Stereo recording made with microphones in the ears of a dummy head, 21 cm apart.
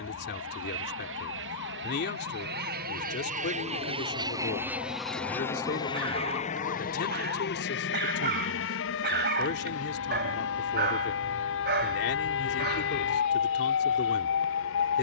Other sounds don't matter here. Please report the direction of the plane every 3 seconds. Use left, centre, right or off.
right, centre, left, left, left.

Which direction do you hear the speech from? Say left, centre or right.
left.